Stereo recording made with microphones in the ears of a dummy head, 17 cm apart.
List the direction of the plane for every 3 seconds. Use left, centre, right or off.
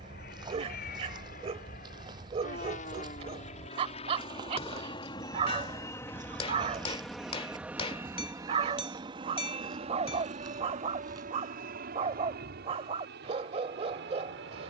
left, left, centre, right, right.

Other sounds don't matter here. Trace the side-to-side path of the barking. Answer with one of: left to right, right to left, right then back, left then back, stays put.
stays put.